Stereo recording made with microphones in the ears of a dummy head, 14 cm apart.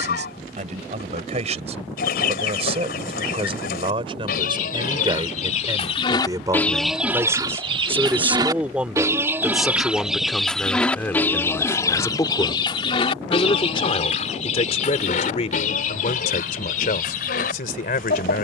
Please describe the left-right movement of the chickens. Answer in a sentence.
You can hear the chickens move from left to right and back again.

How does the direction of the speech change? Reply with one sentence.
You can hear the speech go from the right side to the left.